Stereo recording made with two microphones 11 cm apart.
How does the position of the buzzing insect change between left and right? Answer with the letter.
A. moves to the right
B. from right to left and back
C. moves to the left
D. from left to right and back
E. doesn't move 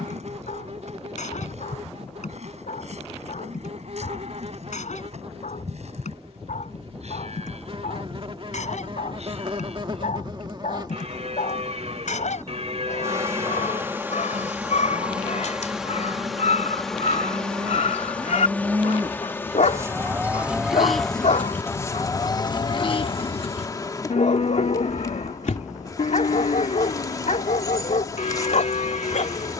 C.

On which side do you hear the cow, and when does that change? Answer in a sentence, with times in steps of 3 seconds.
In this clip you hear the cow on the right from 0 s and on the left from 21 s.